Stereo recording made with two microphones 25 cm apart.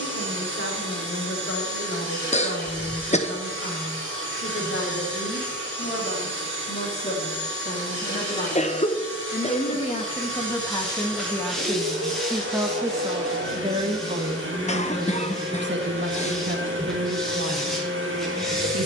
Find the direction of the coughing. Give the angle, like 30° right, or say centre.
30° left.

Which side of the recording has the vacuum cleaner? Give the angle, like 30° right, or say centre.
50° right.